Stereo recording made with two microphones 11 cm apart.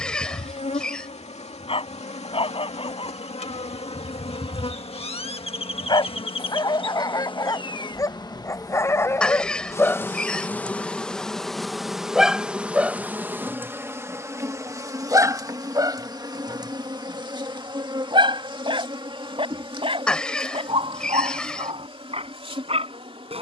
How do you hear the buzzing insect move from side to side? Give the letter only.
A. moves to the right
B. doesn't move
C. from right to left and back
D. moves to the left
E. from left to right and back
A.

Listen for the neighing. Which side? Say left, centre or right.
centre.